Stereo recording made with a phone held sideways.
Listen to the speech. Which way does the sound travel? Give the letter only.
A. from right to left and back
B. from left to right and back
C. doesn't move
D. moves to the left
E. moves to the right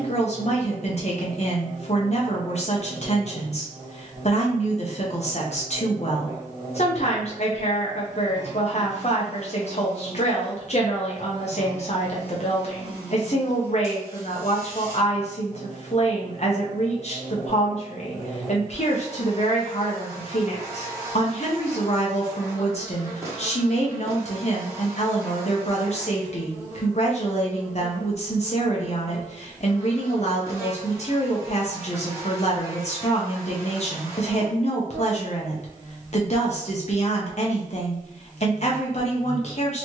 C.